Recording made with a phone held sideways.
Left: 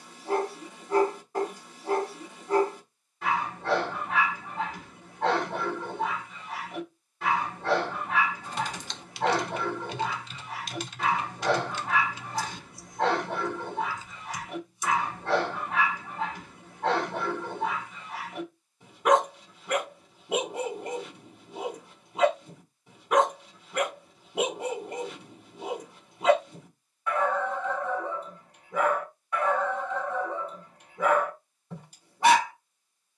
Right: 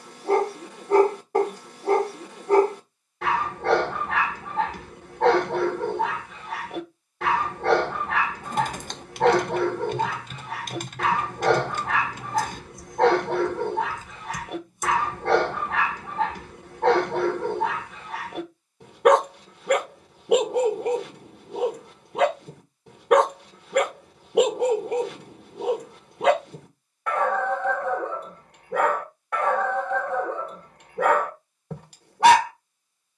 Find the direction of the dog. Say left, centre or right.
right.